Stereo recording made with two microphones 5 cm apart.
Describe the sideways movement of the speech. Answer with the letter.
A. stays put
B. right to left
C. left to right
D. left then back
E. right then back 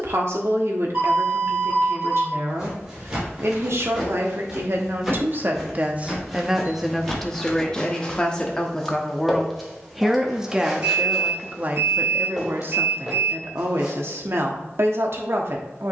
D.